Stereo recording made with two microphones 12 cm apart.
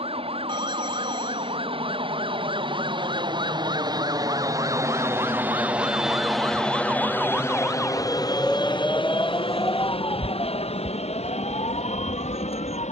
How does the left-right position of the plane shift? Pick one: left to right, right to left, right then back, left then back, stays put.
right to left.